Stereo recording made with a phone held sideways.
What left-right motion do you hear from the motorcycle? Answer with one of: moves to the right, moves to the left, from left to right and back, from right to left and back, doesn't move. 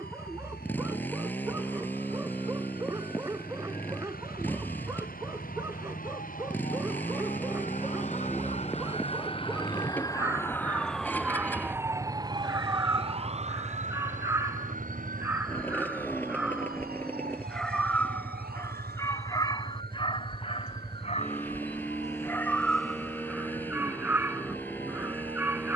doesn't move.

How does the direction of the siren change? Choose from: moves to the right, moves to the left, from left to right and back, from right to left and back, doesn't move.
moves to the right.